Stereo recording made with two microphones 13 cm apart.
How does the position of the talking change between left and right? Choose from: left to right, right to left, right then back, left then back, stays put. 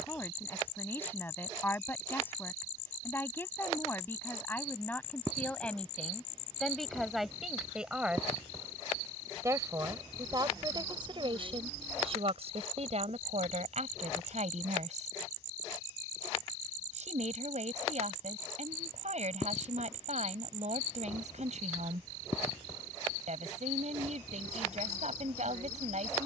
left to right.